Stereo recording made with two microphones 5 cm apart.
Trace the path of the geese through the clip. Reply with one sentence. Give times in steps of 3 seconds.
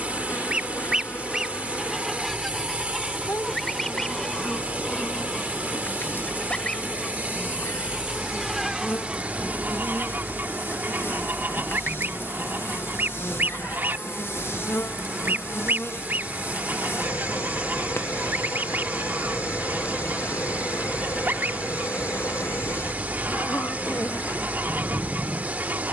In this clip you hear the geese in the centre from 0 s and on the right from 9 s.